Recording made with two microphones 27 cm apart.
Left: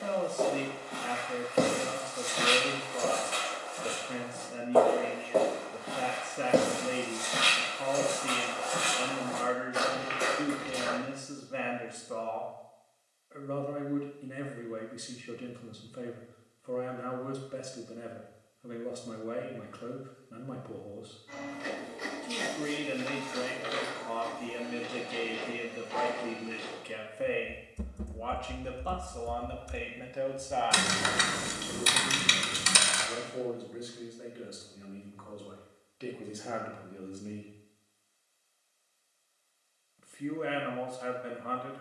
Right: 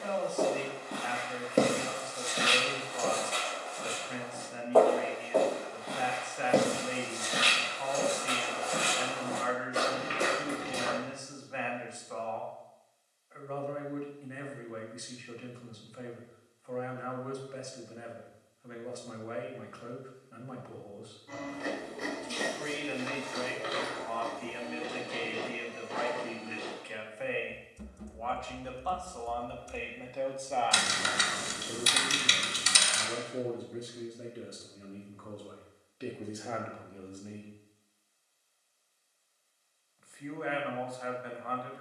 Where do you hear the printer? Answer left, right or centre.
right.